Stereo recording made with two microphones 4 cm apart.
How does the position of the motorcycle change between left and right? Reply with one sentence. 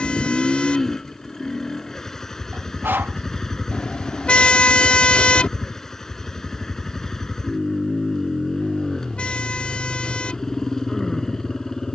In this clip you hear the motorcycle stay in one place.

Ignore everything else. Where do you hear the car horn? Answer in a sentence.
You can hear the car horn on the left.